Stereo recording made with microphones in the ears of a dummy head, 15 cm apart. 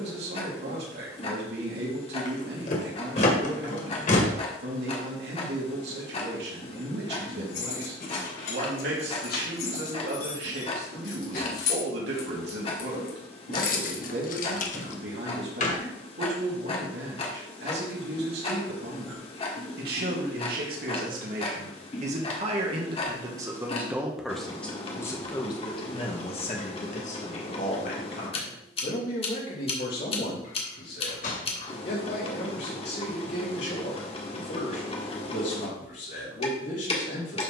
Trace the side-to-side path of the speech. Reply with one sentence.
In this clip you hear the speech travel towards the left.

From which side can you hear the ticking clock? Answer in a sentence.
You can hear the ticking clock on the left.